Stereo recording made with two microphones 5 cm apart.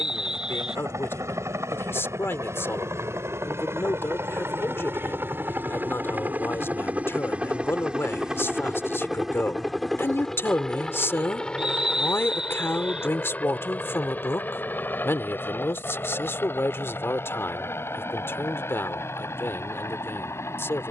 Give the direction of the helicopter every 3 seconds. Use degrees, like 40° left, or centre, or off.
60° right, 50° right, 20° right, 10° left, 30° left, 40° left, 50° left.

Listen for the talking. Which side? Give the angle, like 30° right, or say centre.
50° left.